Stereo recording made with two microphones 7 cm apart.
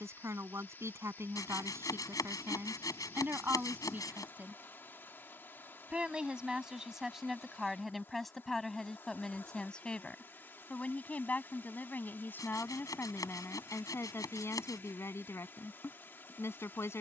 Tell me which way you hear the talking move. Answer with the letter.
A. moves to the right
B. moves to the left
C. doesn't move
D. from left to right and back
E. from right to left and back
B.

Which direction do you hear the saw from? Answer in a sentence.
In this clip you hear the saw on the left.